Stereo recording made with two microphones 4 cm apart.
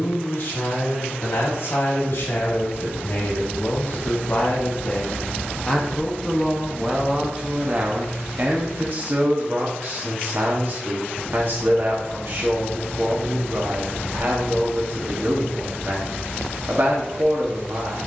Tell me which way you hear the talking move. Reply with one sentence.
In this clip you hear the talking move to the right.